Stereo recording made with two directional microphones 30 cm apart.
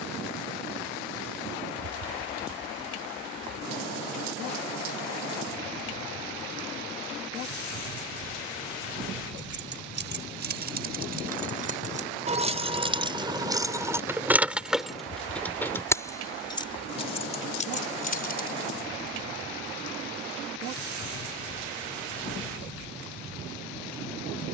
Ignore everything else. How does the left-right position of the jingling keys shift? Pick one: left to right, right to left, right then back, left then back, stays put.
right to left.